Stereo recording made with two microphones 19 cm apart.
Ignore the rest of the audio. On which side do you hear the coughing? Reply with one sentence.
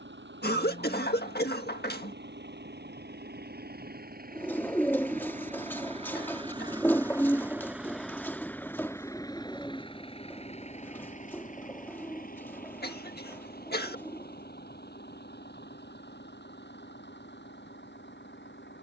In this clip you hear the coughing on the left.